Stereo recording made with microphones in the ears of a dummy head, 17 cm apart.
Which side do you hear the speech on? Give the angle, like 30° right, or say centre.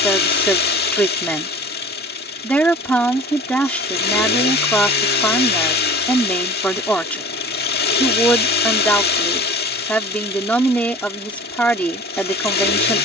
10° left.